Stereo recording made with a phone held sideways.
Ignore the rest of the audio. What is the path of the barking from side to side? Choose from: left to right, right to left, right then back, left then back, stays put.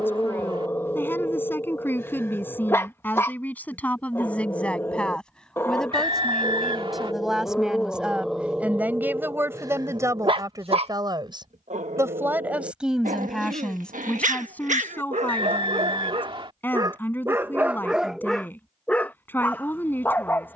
right then back.